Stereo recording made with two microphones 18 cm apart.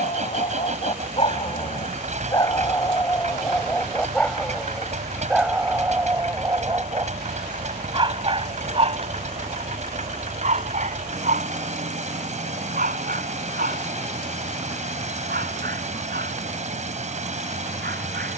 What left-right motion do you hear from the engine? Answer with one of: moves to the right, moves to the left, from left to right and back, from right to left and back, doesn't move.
doesn't move.